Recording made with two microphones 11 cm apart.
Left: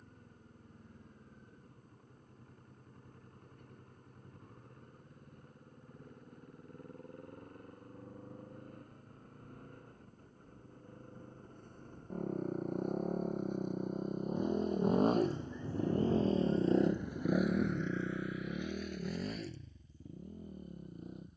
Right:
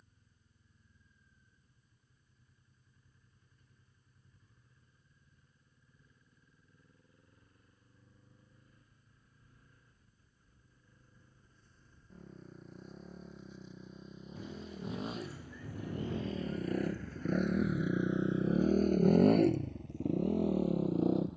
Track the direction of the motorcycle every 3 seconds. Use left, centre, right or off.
left, left, left, left, left, left, right.